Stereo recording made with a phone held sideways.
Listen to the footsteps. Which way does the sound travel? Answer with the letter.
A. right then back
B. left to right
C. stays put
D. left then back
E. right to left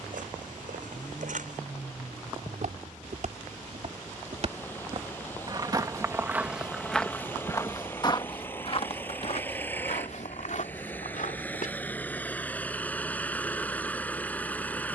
E.